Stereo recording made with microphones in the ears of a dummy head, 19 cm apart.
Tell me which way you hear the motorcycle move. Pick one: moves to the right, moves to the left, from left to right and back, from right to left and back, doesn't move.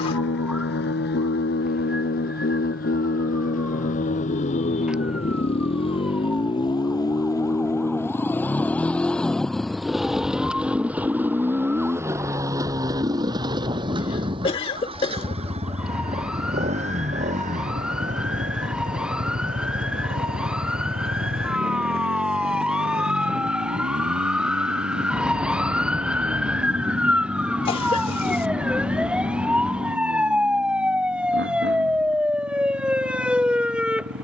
moves to the right.